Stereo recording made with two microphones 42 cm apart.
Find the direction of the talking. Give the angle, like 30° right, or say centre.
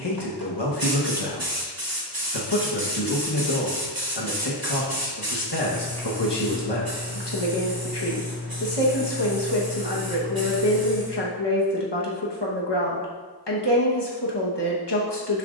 80° left.